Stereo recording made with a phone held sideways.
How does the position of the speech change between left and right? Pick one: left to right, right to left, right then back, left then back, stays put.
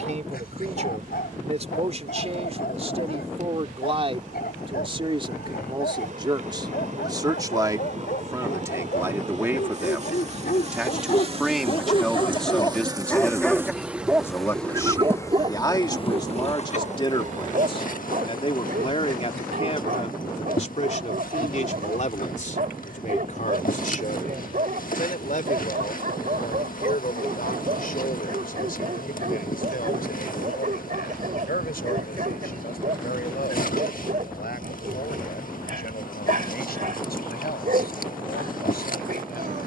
right to left.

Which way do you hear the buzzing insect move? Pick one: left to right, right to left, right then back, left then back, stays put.
right to left.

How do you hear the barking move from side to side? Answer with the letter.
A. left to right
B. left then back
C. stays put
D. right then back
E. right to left
A.